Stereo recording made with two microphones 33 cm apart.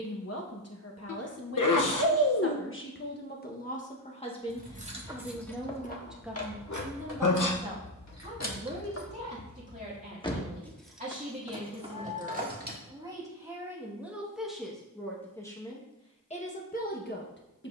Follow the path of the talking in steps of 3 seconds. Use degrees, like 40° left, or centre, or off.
40° left, 20° left, 10° right, 20° right, 10° right, 20° left.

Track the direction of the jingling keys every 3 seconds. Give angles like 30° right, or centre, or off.
off, centre, 50° left, 10° left, 20° right, off.